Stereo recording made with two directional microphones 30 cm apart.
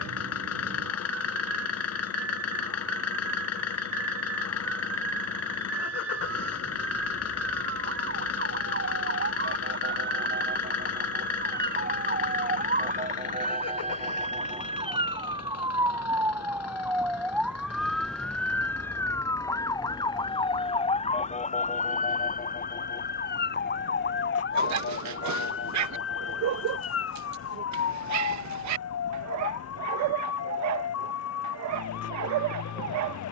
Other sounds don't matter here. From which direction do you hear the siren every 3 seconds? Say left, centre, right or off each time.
right, right, right, right, right, centre, centre, left, left, left, left.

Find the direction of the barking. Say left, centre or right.
right.